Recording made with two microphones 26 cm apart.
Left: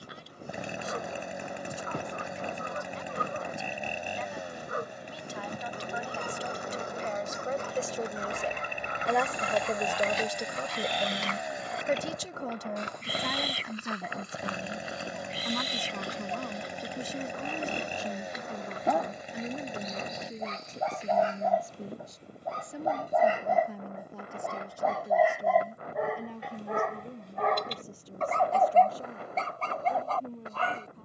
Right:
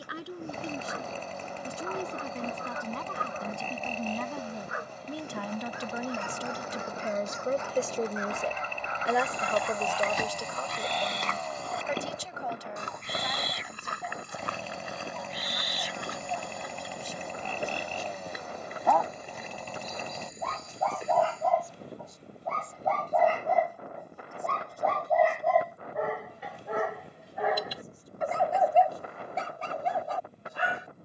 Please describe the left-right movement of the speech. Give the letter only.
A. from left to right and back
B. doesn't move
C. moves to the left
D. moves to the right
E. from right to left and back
C.